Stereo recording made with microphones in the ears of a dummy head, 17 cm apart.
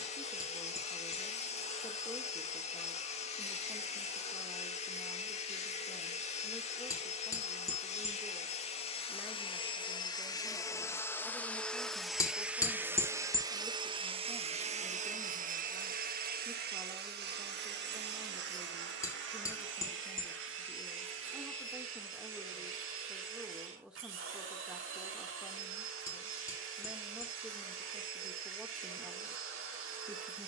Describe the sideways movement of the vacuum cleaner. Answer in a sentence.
In this clip you hear the vacuum cleaner travel towards the right.